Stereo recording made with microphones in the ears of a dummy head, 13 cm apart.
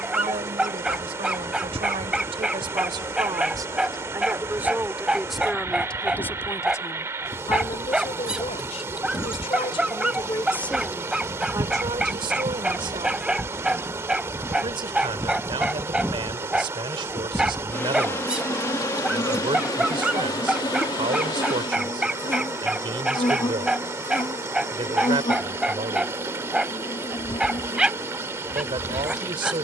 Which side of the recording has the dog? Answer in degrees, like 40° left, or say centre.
10° right.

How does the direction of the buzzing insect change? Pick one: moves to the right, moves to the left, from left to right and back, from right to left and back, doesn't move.
from left to right and back.